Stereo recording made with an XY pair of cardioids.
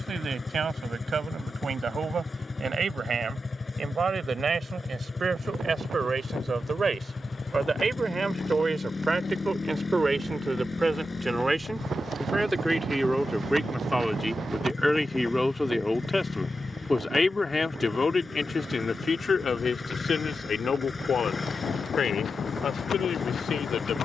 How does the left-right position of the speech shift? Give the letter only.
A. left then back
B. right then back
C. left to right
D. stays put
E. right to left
E.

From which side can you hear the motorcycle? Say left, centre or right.
left.